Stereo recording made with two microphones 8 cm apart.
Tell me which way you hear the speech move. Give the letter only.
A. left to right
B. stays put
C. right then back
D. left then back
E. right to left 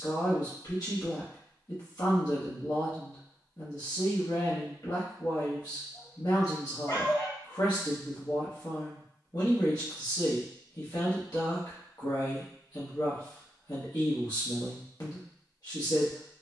B.